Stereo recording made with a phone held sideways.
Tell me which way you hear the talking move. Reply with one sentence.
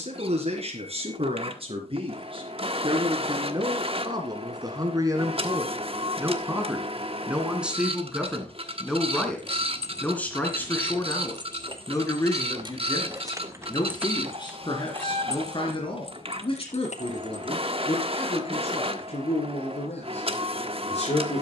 In this clip you hear the talking move to the left.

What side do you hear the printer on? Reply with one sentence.
In this clip you hear the printer on the right.